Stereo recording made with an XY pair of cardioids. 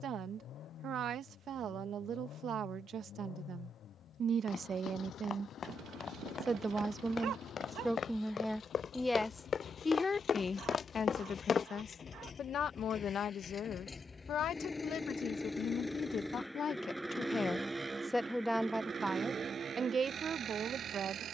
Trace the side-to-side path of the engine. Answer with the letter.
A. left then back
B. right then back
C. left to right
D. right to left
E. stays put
C.